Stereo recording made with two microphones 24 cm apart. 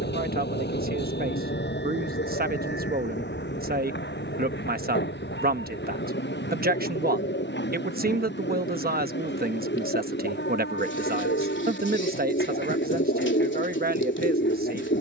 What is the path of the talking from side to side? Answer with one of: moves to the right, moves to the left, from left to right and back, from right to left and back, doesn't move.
doesn't move.